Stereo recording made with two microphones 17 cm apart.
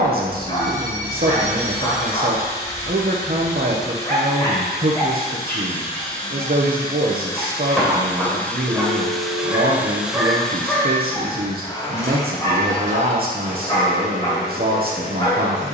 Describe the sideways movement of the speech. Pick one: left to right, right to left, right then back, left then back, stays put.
stays put.